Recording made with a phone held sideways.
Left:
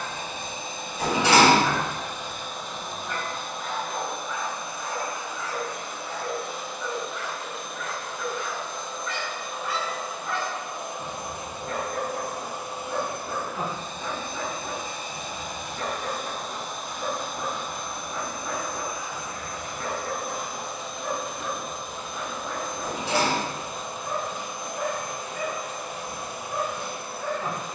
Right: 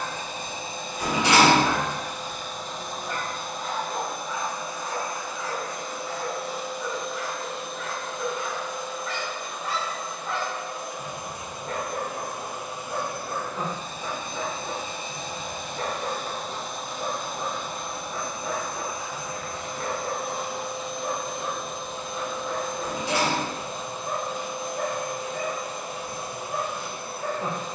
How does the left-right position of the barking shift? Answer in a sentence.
You can hear the barking stay in one place.